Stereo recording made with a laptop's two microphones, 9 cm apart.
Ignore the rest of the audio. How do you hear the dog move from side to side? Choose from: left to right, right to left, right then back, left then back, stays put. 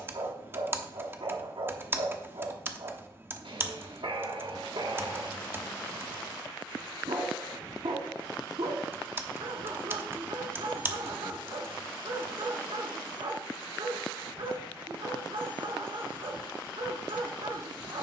stays put.